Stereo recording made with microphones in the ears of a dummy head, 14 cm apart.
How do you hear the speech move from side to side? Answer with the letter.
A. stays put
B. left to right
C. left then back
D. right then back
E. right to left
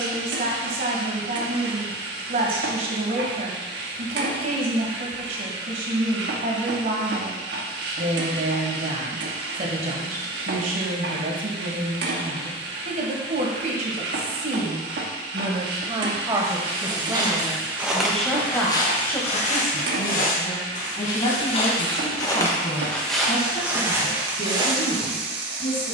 E.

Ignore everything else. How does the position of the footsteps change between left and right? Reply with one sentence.
In this clip you hear the footsteps go left and come back.